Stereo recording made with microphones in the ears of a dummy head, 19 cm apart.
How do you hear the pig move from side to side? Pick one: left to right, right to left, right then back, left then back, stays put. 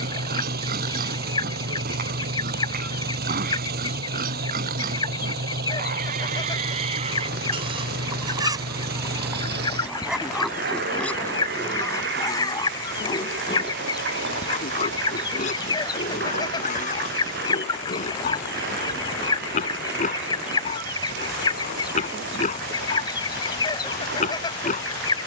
right to left.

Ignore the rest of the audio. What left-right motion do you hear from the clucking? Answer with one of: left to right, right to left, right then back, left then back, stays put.
stays put.